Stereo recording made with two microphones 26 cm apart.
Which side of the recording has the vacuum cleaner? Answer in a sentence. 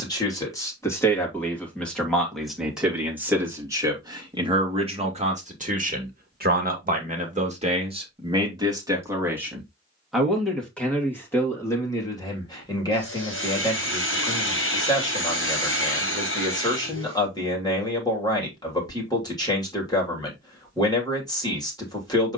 You can hear the vacuum cleaner on the left.